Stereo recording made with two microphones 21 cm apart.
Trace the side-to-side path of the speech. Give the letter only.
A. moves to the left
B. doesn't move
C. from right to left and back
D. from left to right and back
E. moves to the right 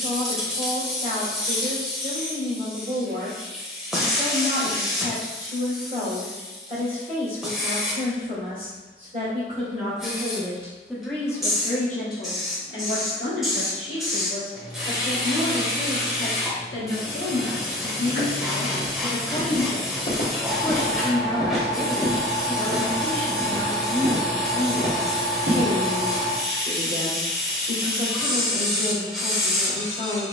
C.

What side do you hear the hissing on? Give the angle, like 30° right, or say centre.
centre.